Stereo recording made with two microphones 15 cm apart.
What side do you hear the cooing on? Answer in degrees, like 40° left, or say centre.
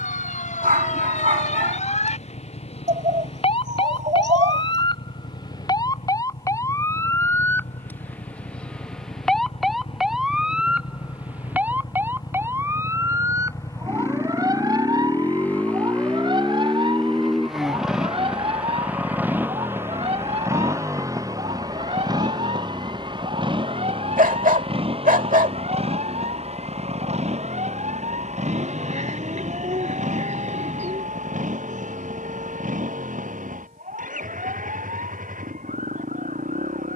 50° right.